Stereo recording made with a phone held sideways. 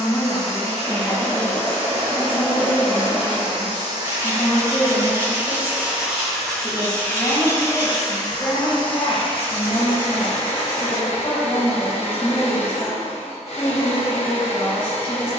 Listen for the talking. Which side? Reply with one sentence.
In this clip you hear the talking in the centre.